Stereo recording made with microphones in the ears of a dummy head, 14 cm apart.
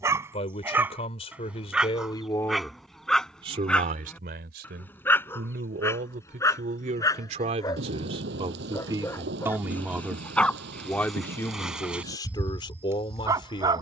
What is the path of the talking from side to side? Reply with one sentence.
You can hear the talking move from left to right and back again.